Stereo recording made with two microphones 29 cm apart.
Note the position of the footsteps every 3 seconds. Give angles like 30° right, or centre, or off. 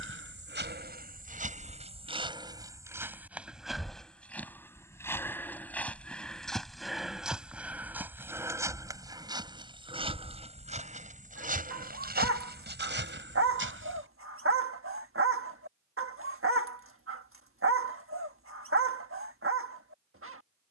30° right, centre, centre, 20° right, 40° right, off, off.